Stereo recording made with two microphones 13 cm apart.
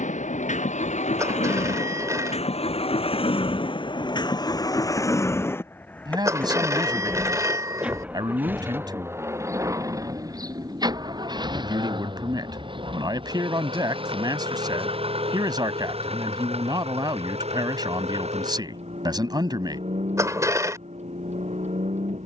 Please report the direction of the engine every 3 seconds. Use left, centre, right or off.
left, left, centre, right, right, right, right, right.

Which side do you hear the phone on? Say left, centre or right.
right.